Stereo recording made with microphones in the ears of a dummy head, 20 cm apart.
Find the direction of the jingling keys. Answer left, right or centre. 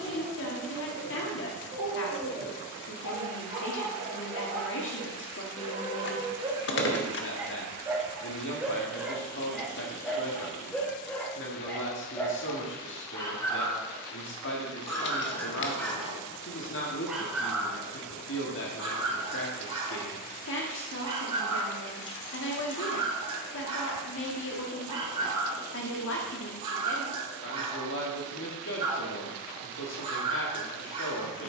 left.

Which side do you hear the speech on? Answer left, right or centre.
left.